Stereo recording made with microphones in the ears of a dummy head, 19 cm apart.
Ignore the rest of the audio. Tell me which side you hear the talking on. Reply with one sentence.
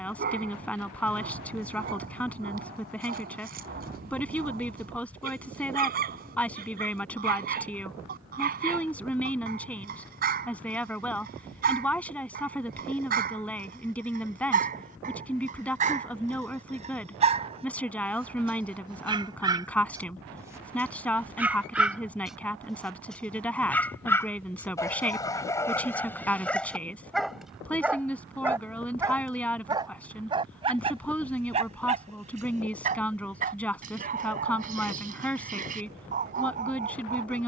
You can hear the talking in the centre.